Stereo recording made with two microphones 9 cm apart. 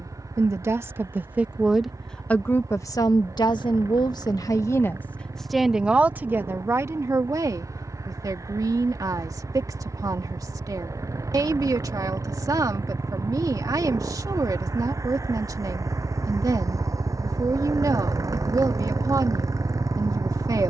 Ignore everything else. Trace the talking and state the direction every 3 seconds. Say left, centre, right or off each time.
centre, left, right, right, right, right, right.